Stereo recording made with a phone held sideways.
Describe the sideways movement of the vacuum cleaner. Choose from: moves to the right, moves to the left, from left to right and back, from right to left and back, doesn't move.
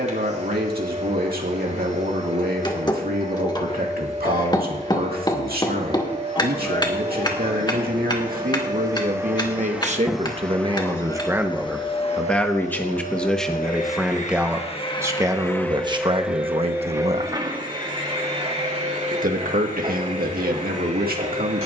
from right to left and back.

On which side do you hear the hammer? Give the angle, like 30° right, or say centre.
30° left.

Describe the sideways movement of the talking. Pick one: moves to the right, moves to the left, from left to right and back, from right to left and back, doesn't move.
from right to left and back.